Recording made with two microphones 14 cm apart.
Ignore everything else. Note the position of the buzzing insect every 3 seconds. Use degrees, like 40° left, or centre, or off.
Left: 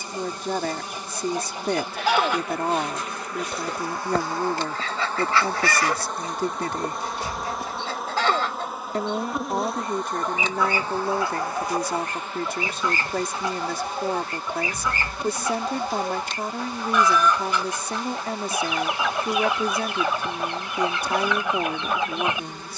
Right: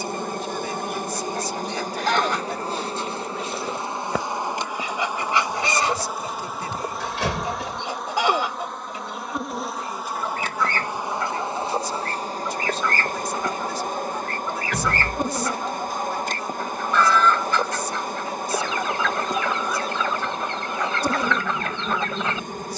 40° right, 20° right, centre, 10° right, 40° right, 40° right, 40° right, 40° right.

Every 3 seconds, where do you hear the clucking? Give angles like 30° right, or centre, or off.
10° left, 10° right, 20° right, 10° left, 10° left, 10° left, 10° left, 10° left.